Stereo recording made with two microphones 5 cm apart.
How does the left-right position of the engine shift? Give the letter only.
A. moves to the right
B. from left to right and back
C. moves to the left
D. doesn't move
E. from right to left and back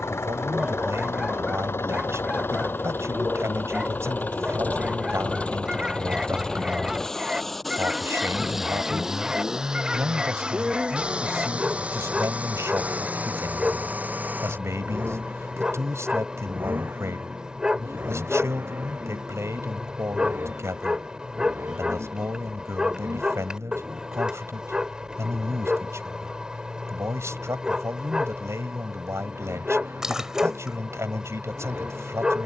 A.